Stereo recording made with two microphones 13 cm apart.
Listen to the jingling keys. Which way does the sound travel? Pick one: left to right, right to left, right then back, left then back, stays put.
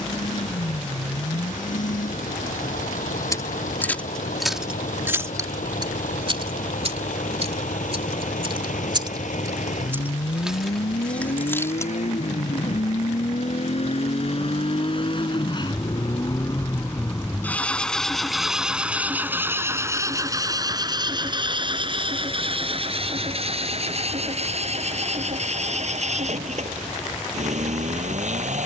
right then back.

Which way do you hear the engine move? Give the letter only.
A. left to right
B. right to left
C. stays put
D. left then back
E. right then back
A.